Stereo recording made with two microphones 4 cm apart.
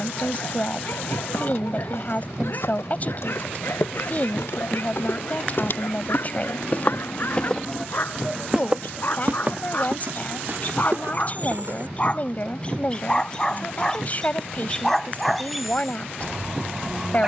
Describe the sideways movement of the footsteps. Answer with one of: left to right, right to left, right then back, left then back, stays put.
left to right.